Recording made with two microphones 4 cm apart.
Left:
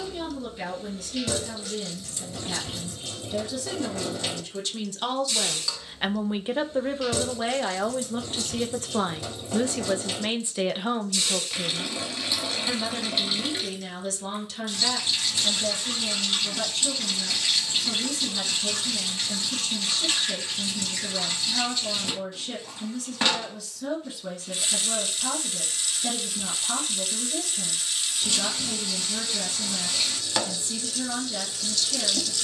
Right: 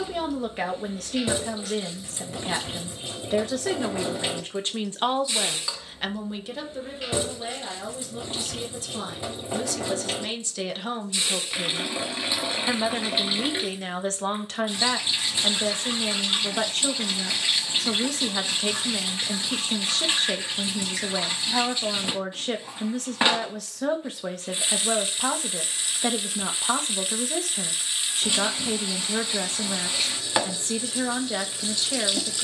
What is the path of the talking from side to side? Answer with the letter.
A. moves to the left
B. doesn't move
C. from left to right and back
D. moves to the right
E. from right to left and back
E.